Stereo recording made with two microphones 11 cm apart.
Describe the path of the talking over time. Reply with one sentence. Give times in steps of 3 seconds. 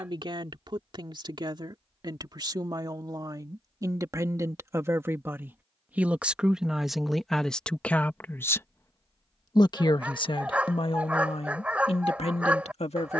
In this clip you hear the talking on the right from 0 s, in the centre from 6 s and on the left from 9 s.